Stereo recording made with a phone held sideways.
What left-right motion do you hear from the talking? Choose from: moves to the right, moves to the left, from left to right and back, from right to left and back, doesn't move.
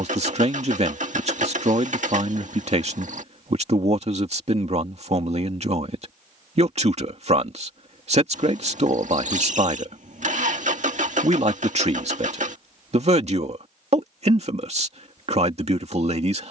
doesn't move.